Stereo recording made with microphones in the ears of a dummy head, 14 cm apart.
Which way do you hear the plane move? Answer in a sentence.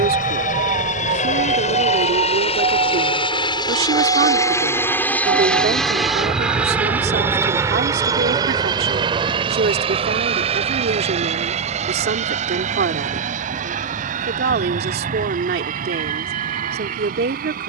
You can hear the plane travel towards the right.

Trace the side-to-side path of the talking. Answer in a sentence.
You can hear the talking stay put.